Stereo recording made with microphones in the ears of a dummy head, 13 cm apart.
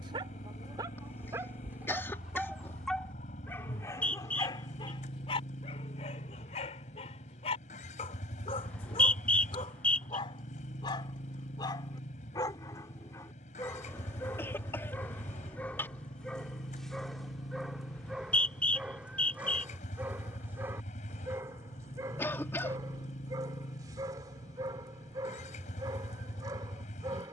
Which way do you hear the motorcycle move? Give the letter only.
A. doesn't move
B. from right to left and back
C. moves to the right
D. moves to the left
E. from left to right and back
A.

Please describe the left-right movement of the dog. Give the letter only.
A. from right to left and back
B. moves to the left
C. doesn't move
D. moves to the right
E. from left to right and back
A.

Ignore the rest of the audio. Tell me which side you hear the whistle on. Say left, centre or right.
centre.